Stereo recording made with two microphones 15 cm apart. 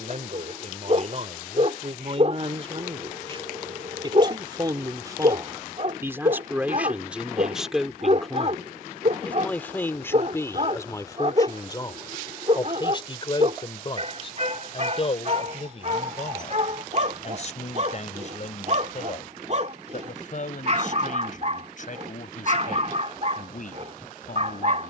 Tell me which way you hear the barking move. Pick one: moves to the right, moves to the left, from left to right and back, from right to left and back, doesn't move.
doesn't move.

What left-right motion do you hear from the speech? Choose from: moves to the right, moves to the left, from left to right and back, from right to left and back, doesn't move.
moves to the left.